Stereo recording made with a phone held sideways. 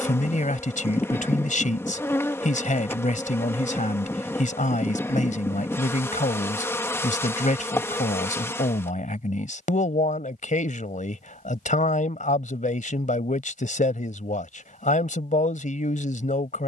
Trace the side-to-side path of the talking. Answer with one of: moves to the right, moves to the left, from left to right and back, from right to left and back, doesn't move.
doesn't move.